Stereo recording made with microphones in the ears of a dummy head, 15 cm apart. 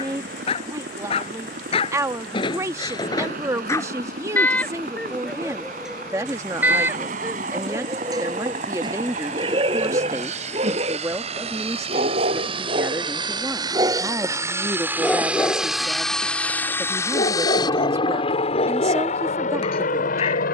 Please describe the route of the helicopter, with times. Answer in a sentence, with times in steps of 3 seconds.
You can hear the helicopter on the right from 0 s, in the centre from 15 s and on the left from 18 s.